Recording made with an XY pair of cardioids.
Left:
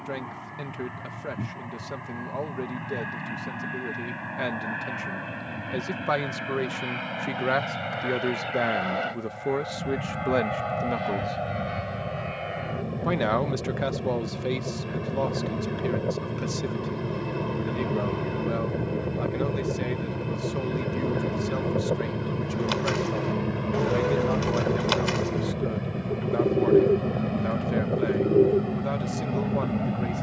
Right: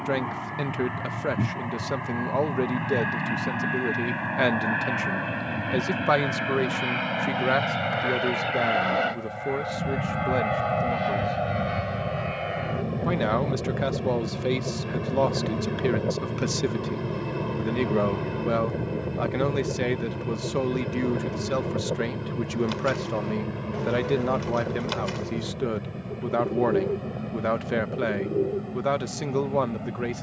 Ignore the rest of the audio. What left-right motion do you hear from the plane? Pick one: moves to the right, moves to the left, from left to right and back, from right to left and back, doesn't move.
moves to the left.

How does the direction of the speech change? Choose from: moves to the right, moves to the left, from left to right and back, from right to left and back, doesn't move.
from right to left and back.